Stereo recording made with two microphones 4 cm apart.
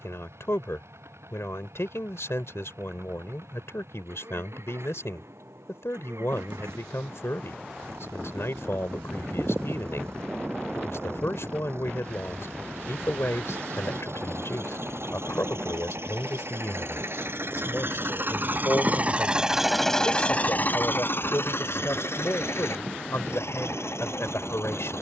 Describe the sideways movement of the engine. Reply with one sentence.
You can hear the engine move from right to left.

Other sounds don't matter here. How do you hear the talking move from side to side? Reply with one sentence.
In this clip you hear the talking stay in one place.